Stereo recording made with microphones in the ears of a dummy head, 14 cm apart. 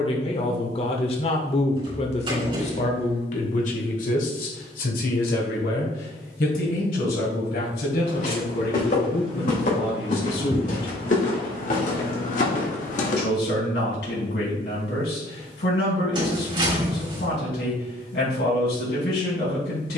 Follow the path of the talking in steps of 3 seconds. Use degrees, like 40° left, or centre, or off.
40° left, 60° left, 70° left, 70° left, 70° left, 70° left, 70° left.